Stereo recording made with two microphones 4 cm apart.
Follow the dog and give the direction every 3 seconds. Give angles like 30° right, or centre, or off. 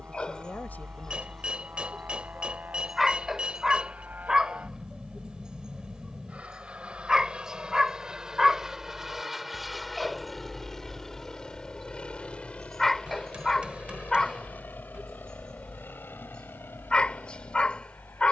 10° left, 20° right, 10° right, centre, 10° left, 20° left.